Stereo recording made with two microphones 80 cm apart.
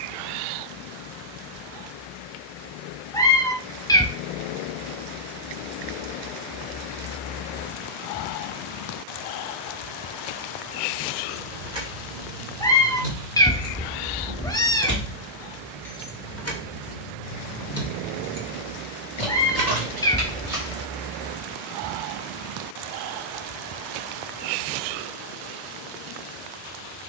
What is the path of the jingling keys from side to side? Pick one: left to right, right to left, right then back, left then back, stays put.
left then back.